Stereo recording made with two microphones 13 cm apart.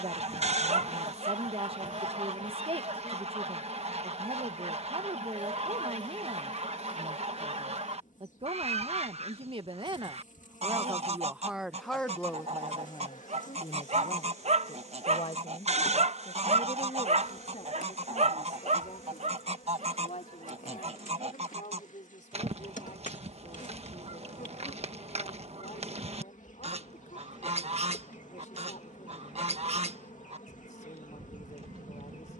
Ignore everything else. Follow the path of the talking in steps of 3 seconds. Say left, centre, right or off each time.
right, right, right, right, left, left, left, left, left, left, left.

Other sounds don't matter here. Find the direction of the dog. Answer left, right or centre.
right.